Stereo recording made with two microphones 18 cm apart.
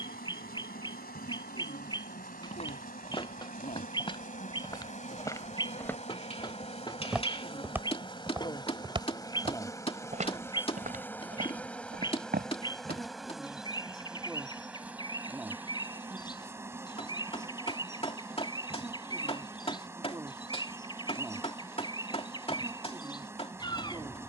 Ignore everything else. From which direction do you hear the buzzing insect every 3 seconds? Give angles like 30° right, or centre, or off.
60° left, 50° left, 30° left, 10° left, centre, 10° right, 10° right, 10° right.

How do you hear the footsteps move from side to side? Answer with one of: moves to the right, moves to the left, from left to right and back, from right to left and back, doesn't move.
moves to the right.